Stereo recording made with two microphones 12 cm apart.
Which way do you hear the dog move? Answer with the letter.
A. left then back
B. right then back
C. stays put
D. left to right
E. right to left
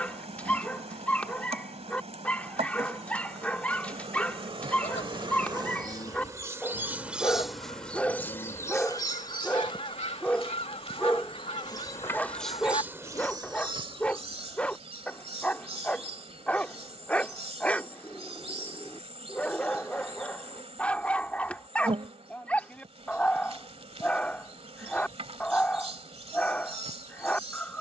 C.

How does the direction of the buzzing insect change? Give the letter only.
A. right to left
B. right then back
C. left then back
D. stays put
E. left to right
C.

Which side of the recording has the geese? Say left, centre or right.
left.